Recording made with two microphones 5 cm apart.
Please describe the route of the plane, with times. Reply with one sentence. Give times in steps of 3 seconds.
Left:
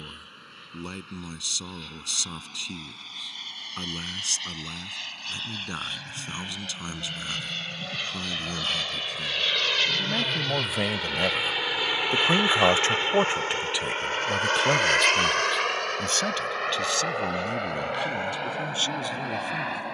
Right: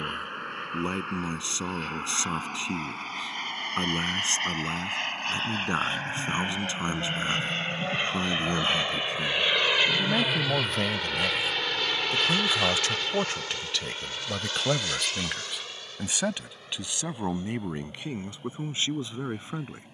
You can hear the plane on the right from 0 s, in the centre from 9 s and on the left from 12 s.